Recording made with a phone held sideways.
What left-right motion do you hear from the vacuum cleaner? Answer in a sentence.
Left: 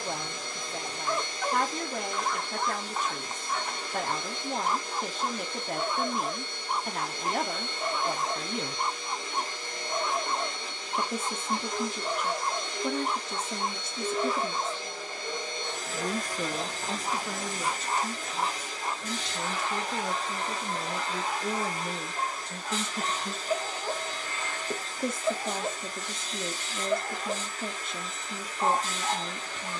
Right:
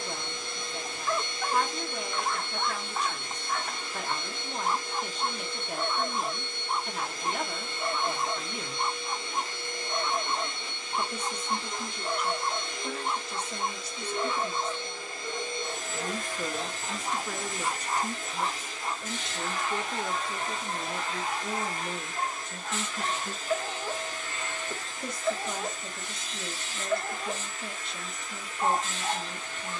You can hear the vacuum cleaner stay put.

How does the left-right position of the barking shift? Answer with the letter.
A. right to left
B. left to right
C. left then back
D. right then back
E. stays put
E.